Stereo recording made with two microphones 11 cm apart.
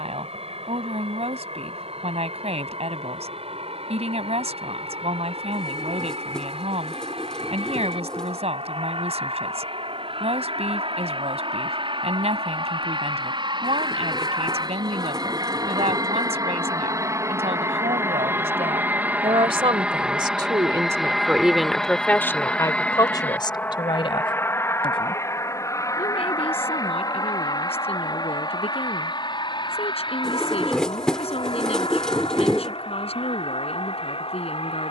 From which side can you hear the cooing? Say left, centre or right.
centre.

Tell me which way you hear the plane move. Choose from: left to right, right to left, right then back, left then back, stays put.
right to left.